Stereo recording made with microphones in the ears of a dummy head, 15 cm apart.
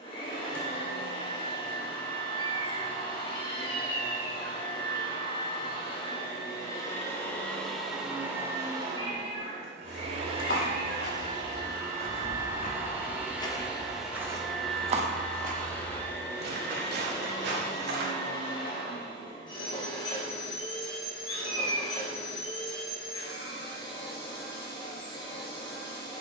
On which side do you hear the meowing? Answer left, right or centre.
left.